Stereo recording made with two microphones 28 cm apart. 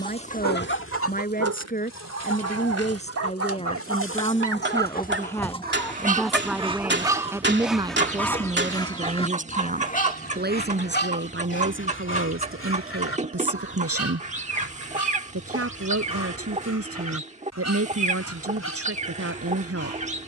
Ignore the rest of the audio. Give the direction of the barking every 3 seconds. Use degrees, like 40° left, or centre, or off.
70° right, 50° right, 10° right, 30° left, 50° left, 60° left, 60° left.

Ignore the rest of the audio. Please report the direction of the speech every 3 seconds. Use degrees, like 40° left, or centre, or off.
30° left, 20° left, 10° right, 40° right, 50° right, 50° right, 50° right.